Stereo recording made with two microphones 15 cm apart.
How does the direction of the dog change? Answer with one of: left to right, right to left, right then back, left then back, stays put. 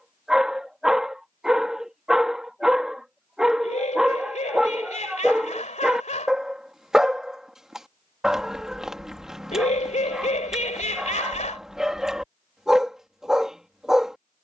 stays put.